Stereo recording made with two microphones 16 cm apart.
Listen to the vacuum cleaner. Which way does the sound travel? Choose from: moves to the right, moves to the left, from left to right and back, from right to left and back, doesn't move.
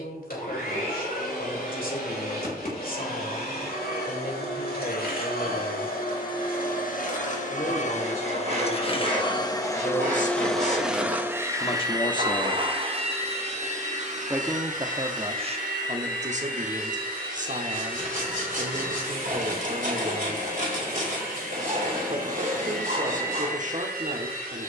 moves to the right.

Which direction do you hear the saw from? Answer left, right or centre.
right.